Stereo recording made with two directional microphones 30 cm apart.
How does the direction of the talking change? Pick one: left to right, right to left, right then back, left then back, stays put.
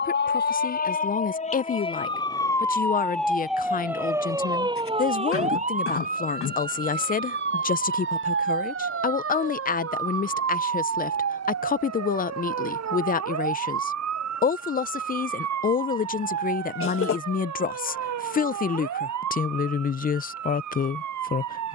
stays put.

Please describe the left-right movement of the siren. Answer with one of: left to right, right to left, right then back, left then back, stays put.
left to right.